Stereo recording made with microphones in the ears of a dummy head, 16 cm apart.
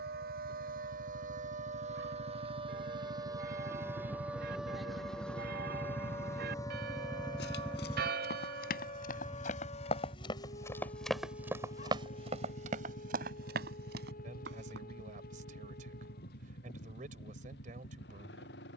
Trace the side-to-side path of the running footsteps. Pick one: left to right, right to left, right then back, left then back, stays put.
left to right.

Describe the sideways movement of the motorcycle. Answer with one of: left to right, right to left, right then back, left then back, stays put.
right to left.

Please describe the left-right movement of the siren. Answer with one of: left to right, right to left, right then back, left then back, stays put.
right to left.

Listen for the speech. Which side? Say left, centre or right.
right.